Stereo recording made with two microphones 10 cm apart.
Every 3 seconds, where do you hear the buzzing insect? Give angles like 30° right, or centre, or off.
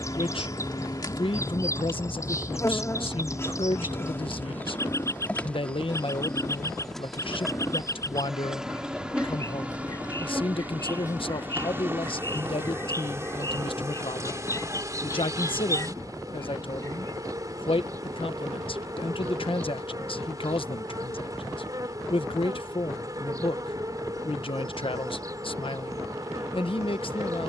40° left, 20° left, centre, 10° right, 30° right, 30° right, 40° right, 40° right, 40° right.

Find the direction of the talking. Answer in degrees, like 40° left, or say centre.
60° left.